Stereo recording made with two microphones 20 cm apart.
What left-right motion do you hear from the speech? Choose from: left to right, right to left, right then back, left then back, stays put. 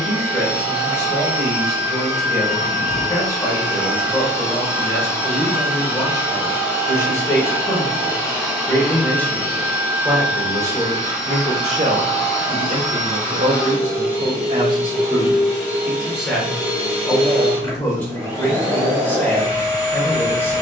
right then back.